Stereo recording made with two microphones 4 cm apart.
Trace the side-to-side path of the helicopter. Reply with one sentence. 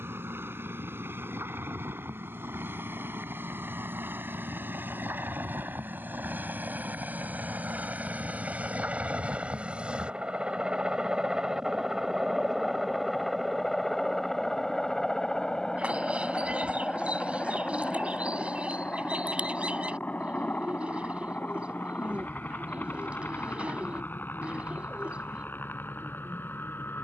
You can hear the helicopter travel towards the left.